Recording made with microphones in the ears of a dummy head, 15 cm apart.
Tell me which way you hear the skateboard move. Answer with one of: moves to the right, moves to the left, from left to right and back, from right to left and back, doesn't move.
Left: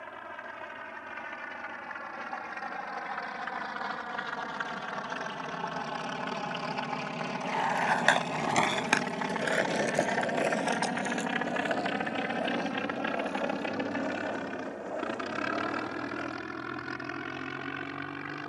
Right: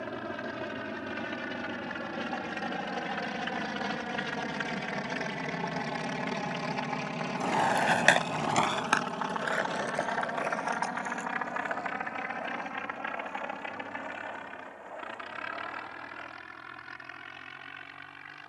moves to the left.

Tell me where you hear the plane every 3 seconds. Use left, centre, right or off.
right, right, centre, left, left, left.